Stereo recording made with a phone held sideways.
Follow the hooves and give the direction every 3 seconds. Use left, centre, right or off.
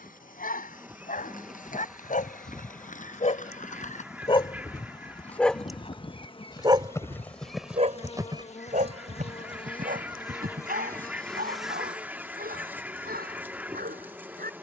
left, left, centre, right, off.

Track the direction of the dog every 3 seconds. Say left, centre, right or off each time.
left, left, right, right, right.